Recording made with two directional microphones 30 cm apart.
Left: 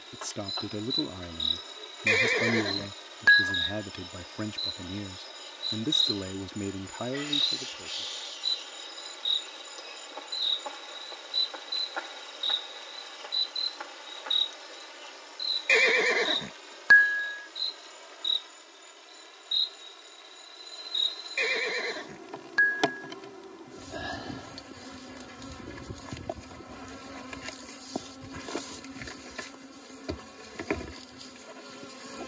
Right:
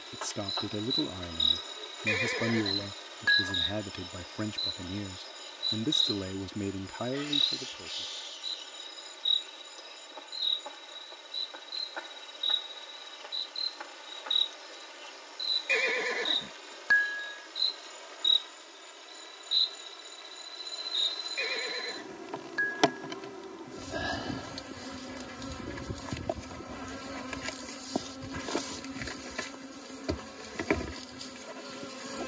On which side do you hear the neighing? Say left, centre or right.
left.